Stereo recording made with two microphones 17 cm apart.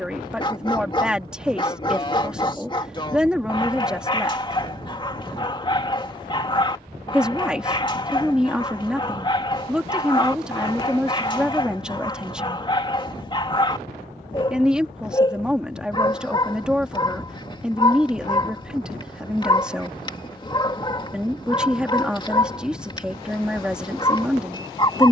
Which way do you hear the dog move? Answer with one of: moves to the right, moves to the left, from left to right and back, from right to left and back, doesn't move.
doesn't move.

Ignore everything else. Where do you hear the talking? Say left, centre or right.
centre.